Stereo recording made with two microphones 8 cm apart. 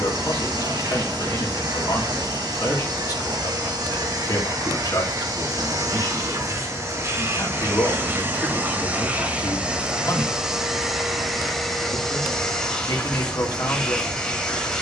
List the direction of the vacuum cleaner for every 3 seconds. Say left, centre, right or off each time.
right, right, right, centre, centre.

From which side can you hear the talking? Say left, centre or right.
left.